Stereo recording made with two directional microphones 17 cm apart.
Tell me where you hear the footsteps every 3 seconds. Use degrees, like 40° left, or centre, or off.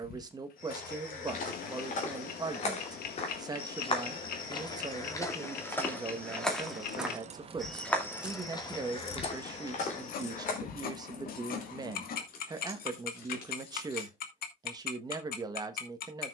50° left, 20° left, 10° left, 40° left, off, off.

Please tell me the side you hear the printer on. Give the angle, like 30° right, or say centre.
60° left.